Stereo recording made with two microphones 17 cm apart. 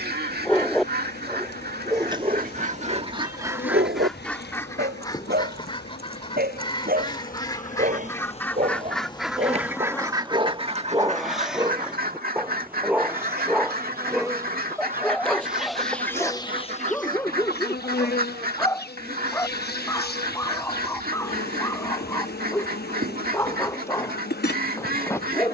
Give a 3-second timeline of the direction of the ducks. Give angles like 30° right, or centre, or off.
60° right, 10° left, 20° left, 30° right, 60° right, 60° right, 60° right, 60° right, 60° right.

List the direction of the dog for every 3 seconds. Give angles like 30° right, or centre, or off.
20° right, 70° right, 50° right, 30° right, centre, 10° left, 20° left, 20° left, 20° left.